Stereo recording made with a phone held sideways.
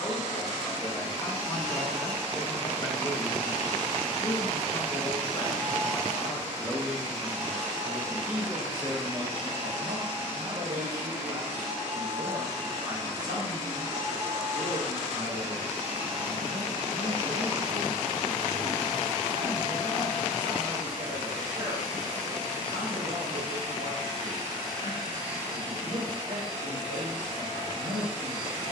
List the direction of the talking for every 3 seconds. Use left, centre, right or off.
left, left, centre, right, right, right, right, right, right, right.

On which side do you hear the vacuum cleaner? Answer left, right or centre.
right.